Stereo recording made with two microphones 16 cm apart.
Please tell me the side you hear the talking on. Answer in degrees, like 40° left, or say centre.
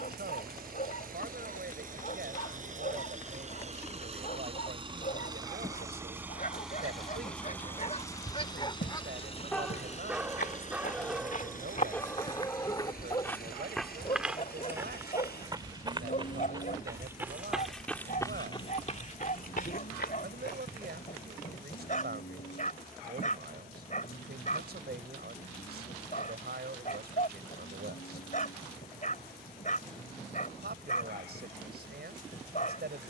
80° right.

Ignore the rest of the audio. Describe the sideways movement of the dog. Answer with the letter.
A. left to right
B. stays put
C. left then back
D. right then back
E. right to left
D.